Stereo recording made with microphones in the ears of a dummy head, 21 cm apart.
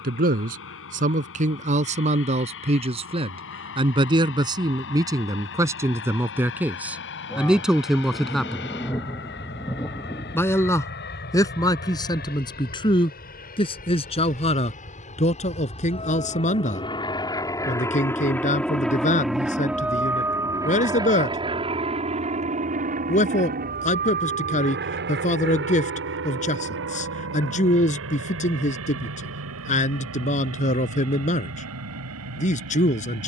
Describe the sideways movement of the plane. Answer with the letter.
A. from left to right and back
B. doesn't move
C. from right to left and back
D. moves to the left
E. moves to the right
E.